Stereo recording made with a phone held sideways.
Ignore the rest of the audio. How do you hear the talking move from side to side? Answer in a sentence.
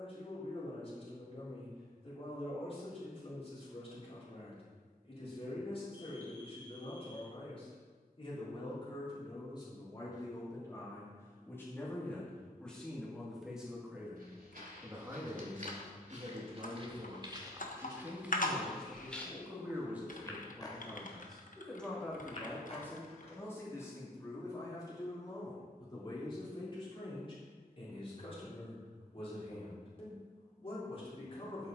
In this clip you hear the talking move from left to right and back again.